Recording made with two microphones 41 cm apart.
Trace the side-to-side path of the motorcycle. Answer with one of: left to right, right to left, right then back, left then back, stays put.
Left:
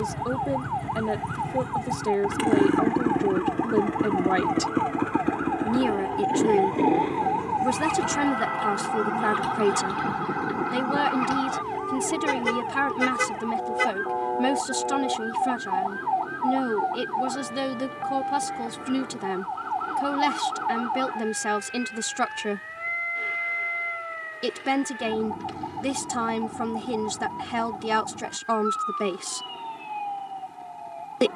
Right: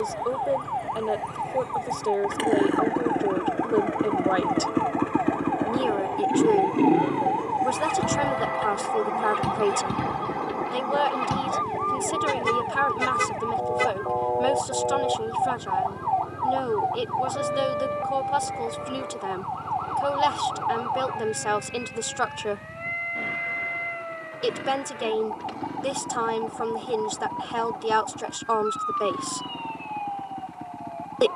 left to right.